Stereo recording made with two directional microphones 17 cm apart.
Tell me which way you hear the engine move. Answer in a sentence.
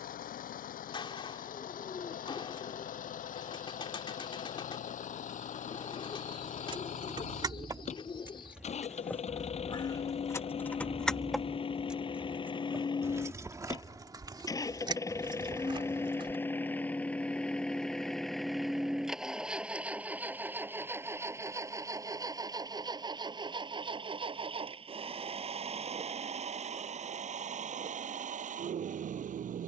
You can hear the engine move from left to right.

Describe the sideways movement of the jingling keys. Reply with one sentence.
In this clip you hear the jingling keys move from right to left and back again.